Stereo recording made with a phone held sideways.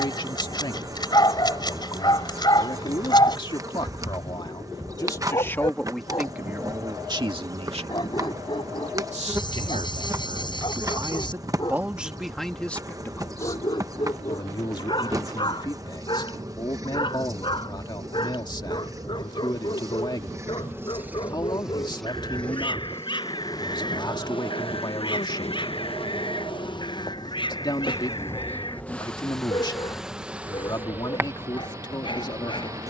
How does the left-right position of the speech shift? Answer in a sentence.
In this clip you hear the speech move from left to right and back again.